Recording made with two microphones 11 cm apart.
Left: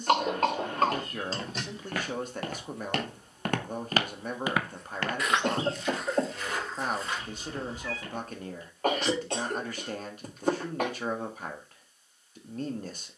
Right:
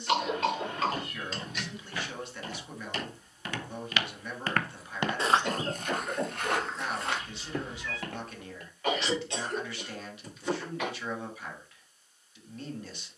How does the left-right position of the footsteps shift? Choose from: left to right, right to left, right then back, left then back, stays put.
left to right.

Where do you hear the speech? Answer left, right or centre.
left.